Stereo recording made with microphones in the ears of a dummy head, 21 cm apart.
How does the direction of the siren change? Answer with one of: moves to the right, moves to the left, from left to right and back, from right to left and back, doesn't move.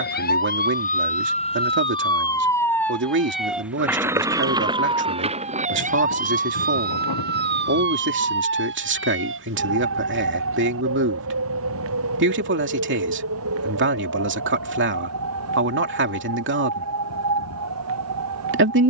moves to the right.